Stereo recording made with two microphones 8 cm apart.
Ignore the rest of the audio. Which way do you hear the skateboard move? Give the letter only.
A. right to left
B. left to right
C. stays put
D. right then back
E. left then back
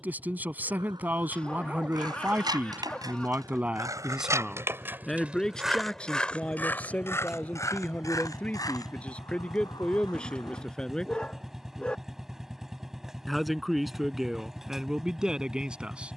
A.